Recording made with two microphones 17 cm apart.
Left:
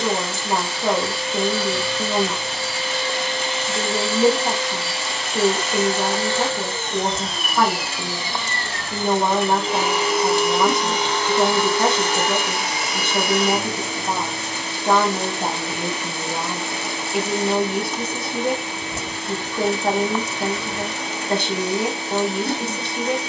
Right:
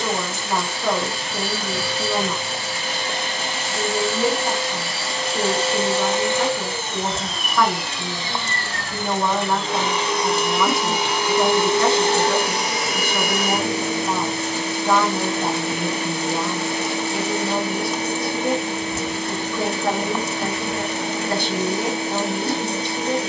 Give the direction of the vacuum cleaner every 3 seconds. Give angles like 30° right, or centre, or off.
50° right, 40° right, centre, centre, 40° right, 40° right, 40° right, 40° right.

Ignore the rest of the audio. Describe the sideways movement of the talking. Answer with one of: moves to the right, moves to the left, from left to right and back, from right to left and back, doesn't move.
doesn't move.